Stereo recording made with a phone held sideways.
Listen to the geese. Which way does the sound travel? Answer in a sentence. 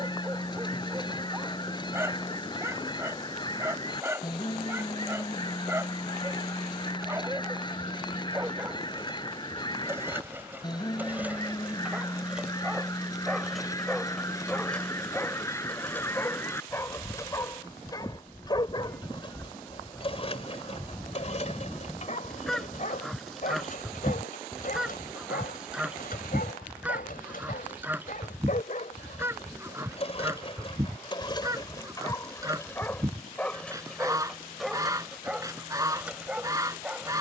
You can hear the geese move to the right.